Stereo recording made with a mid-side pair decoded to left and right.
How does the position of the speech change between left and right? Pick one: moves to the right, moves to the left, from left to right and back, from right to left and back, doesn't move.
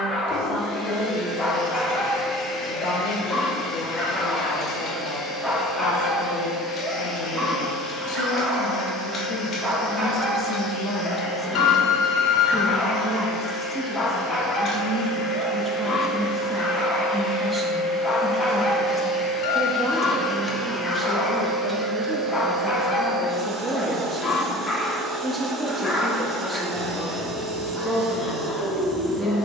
moves to the right.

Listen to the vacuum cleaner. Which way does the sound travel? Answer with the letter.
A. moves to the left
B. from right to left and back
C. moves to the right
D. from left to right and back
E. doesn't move
C.